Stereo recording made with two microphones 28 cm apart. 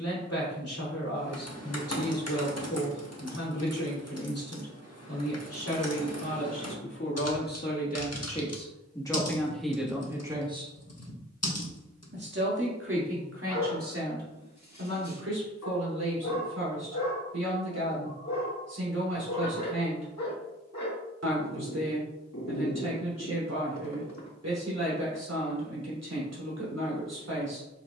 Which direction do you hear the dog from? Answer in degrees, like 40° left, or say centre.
70° left.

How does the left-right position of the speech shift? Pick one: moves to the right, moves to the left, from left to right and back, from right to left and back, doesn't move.
moves to the right.